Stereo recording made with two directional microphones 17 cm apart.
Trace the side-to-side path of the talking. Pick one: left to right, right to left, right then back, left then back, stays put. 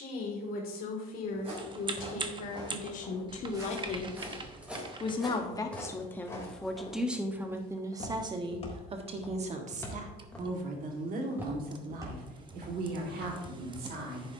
left to right.